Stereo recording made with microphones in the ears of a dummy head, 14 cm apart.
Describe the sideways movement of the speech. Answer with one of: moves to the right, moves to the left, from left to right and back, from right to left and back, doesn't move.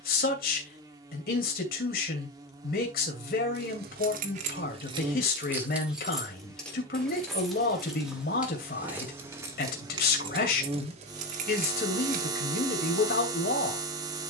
doesn't move.